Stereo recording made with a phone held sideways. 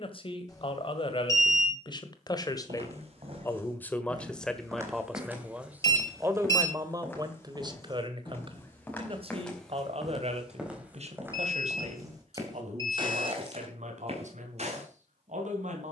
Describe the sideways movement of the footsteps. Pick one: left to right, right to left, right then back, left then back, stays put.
left then back.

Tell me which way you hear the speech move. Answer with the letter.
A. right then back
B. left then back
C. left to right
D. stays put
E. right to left
C.